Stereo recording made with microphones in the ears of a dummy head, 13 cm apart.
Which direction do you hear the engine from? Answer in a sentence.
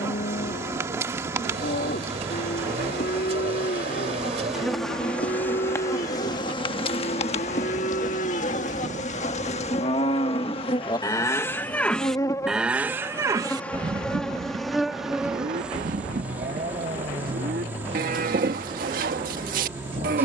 You can hear the engine on the right.